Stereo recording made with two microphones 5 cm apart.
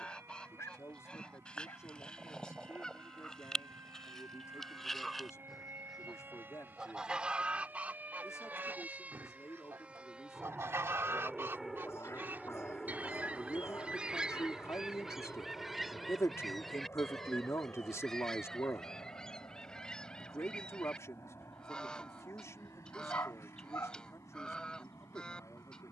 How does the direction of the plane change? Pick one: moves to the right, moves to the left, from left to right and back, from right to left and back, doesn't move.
moves to the left.